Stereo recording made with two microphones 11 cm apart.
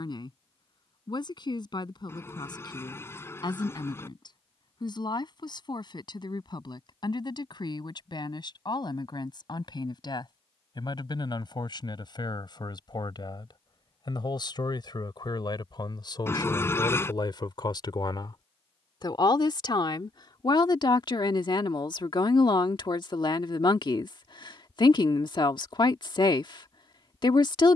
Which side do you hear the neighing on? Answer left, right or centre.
left.